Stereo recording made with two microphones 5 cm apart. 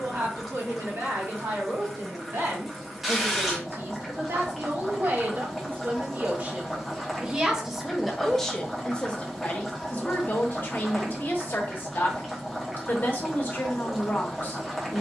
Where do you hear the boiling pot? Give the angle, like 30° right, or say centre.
10° right.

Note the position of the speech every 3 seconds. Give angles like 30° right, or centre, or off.
70° right, 60° right, 10° right, 40° left, 50° left.